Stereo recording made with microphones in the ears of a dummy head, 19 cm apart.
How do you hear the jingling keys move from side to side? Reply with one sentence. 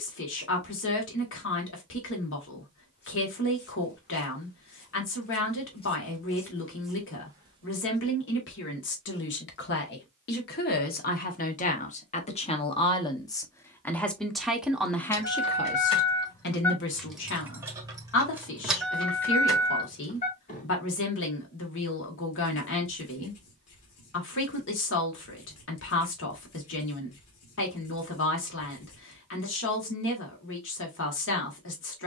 You can hear the jingling keys move from left to right and back again.